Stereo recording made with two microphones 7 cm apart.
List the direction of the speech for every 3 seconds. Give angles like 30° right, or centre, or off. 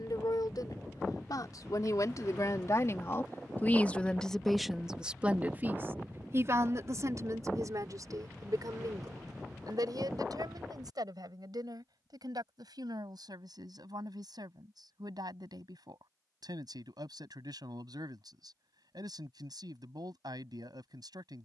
60° left, centre, 50° right, 70° right, 70° right, 70° right, 70° right.